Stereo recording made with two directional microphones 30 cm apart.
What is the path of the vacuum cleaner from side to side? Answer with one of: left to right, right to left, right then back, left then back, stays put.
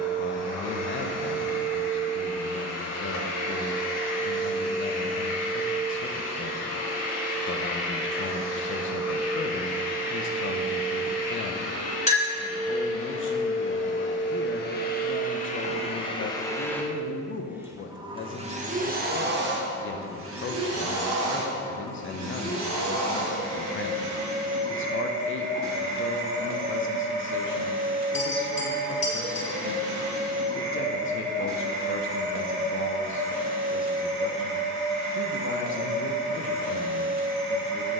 left to right.